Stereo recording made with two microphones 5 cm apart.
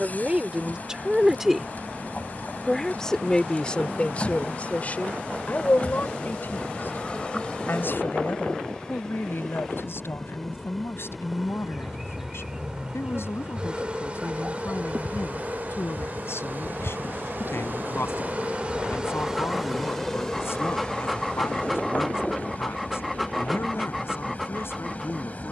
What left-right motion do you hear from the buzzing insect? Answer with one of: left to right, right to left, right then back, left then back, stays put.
right then back.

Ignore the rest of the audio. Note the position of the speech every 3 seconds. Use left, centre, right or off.
centre, left, left, left, left, left, left, left, left.